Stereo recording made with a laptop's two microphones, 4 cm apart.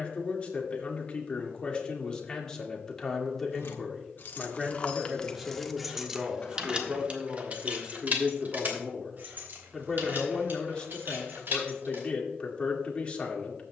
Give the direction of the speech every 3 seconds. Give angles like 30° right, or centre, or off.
20° left, centre, 20° right, 20° left, 30° left.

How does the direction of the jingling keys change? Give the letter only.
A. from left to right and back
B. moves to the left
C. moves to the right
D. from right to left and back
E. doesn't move
C.